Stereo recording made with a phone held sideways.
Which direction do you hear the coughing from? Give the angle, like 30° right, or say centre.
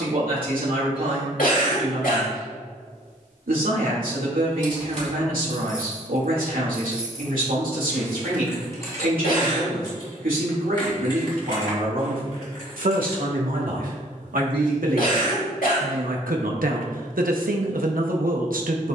80° left.